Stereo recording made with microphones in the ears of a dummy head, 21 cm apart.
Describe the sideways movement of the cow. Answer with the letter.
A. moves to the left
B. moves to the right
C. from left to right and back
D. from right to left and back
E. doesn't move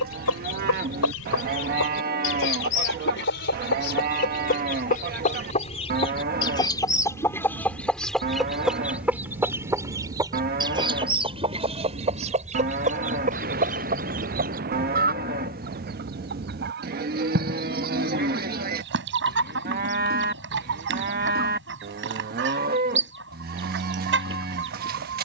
E.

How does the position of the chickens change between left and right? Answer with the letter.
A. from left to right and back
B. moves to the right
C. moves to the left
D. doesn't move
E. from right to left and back
B.